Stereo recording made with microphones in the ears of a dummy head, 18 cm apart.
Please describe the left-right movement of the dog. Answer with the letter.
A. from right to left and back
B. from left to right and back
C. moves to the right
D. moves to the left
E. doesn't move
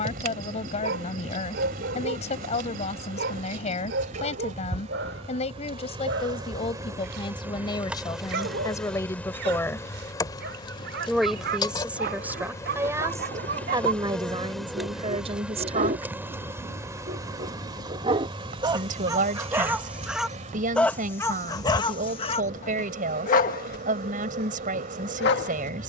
D.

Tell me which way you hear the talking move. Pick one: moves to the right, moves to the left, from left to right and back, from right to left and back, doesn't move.
moves to the right.